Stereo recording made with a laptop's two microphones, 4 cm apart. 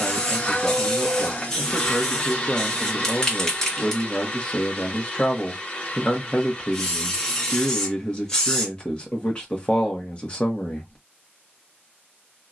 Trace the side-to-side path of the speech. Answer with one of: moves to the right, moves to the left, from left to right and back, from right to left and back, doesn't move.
doesn't move.